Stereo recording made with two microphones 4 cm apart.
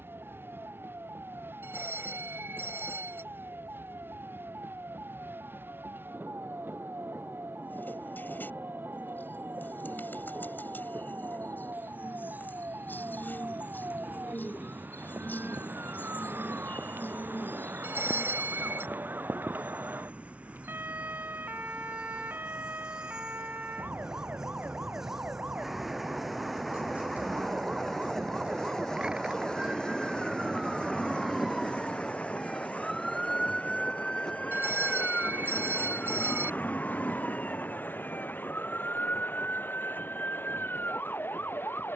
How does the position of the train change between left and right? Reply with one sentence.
In this clip you hear the train go from the right side to the left.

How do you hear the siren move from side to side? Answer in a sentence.
You can hear the siren travel towards the left.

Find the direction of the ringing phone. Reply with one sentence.
You can hear the ringing phone on the right.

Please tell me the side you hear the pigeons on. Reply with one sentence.
In this clip you hear the pigeons on the left.